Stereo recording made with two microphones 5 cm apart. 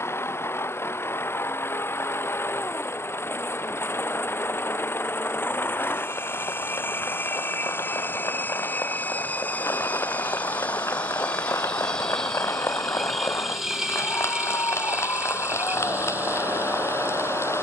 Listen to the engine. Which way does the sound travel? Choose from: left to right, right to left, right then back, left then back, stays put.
left to right.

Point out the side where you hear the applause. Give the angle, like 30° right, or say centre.
80° left.